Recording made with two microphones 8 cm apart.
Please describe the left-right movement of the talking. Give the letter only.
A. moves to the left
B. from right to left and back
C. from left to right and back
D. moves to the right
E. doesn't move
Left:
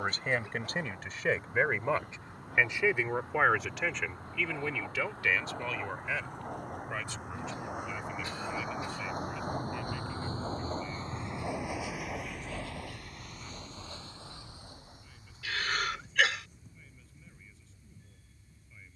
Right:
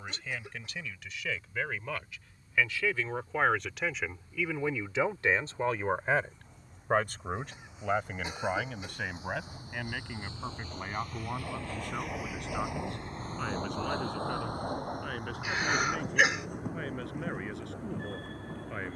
D.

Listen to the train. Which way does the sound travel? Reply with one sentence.
In this clip you hear the train move from left to right.